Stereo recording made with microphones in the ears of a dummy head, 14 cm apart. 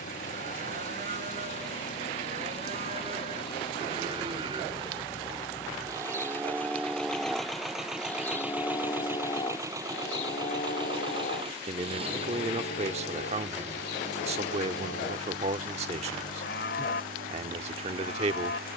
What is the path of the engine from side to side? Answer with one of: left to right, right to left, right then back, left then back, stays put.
left to right.